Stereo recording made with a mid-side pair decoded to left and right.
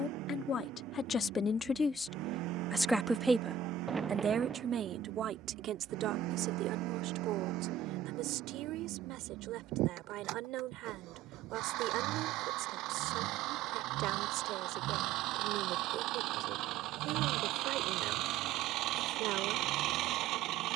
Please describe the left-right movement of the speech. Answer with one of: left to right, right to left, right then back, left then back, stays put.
left to right.